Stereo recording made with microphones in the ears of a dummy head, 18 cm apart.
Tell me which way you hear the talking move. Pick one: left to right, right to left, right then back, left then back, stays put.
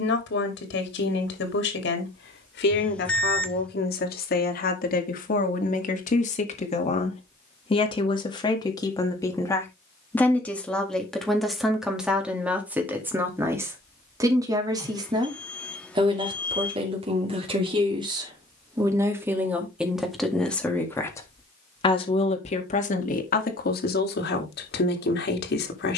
right then back.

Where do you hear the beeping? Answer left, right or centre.
centre.